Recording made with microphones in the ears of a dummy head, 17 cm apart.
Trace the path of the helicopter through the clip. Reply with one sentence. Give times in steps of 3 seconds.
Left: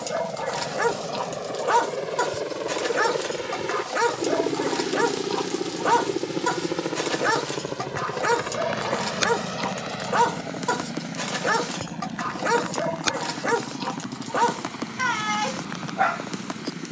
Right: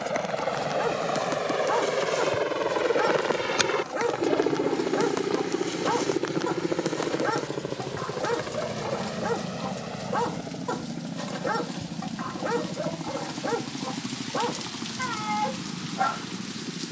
In this clip you hear the helicopter on the right from 0 s, in the centre from 3 s and on the left from 6 s.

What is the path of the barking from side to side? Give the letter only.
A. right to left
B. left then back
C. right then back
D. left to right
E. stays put
E.